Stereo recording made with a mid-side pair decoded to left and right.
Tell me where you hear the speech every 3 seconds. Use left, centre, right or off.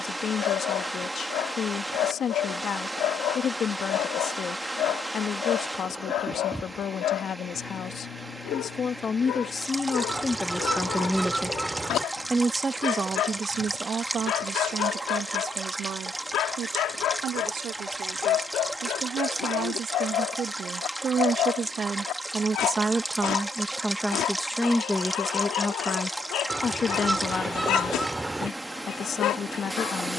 left, left, left, left, right, right, right, right, left, left.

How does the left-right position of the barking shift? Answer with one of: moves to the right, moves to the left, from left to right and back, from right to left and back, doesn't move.
doesn't move.